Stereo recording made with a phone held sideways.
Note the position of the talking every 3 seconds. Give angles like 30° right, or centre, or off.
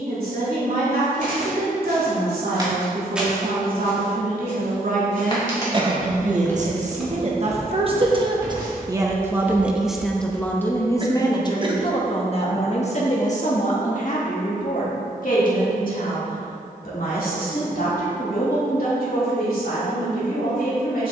70° right, 60° right, 40° right, 10° left, 50° left, 70° left, 70° left.